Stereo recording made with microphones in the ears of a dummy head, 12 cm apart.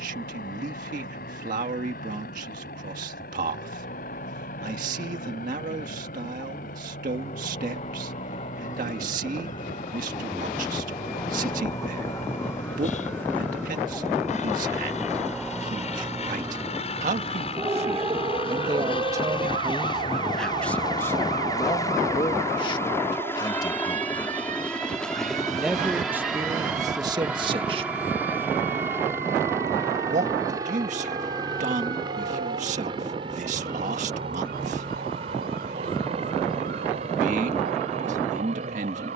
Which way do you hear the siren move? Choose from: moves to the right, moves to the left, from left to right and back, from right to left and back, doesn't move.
moves to the right.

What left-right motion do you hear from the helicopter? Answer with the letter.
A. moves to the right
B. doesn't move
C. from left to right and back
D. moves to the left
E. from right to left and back
A.